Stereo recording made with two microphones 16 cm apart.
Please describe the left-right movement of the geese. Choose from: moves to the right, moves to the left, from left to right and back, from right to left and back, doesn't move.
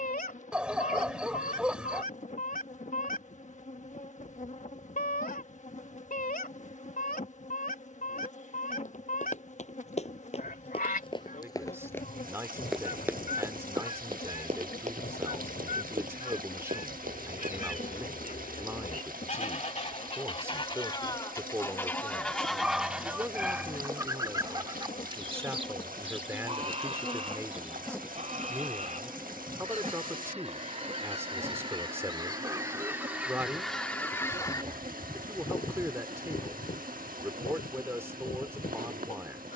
from left to right and back.